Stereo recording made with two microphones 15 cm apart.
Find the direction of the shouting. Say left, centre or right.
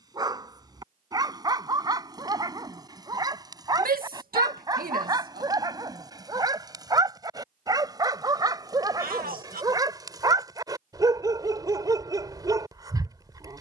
right.